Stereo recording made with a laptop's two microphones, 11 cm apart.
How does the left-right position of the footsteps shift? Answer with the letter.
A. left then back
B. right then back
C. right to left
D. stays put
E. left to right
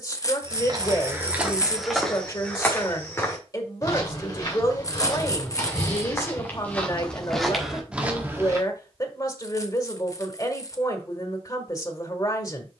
A.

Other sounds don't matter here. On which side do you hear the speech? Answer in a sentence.
In this clip you hear the speech on the left.